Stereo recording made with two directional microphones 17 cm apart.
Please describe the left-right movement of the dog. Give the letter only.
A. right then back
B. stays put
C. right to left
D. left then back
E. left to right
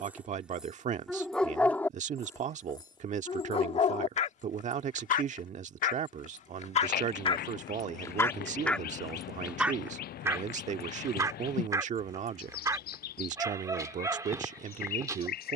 D.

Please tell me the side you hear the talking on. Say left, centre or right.
right.